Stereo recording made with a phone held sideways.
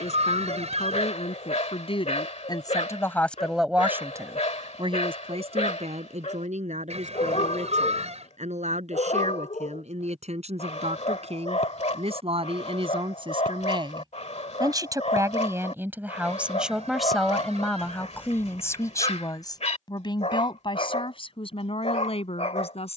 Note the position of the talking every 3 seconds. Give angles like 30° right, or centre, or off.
50° left, 30° right, 70° right, 60° right, 40° right, 10° right, 30° left, 50° left.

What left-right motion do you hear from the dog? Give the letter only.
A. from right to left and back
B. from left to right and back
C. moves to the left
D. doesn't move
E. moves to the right
D.